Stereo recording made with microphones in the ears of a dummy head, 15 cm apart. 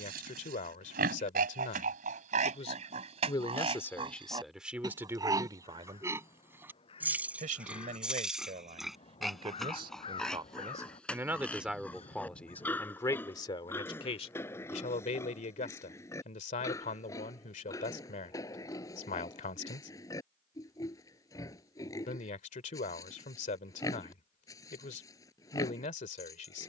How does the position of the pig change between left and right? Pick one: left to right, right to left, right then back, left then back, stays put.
right to left.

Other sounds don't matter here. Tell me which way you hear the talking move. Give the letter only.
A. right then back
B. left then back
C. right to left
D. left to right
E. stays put
A.